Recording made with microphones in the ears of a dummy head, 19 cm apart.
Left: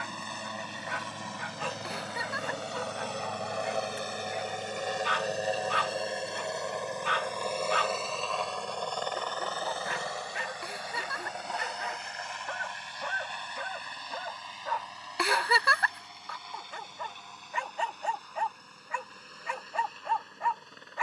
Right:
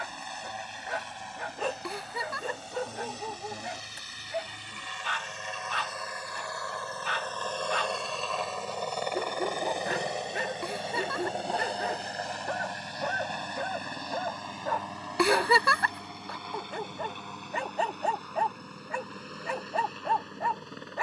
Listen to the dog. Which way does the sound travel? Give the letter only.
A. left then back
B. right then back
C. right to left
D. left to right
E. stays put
E.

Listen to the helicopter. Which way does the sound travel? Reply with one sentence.
You can hear the helicopter go from the left side to the right.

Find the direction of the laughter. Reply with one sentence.
In this clip you hear the laughter on the right.